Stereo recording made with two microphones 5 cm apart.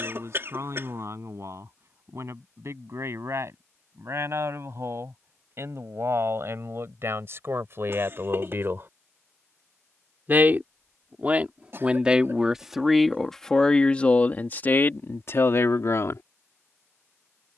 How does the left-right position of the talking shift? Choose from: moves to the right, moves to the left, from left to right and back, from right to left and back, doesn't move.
moves to the left.